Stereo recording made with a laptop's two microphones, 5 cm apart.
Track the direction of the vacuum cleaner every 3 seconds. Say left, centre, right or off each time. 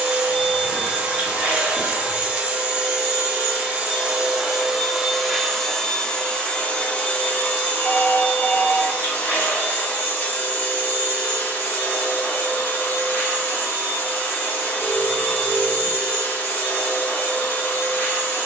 right, centre, left, left, left, left.